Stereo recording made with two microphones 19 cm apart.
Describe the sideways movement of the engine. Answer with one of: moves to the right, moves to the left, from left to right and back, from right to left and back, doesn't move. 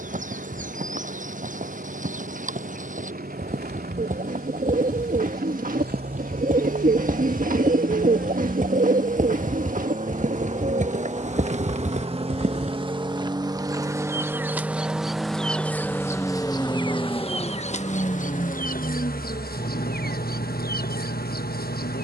moves to the left.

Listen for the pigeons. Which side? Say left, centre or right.
right.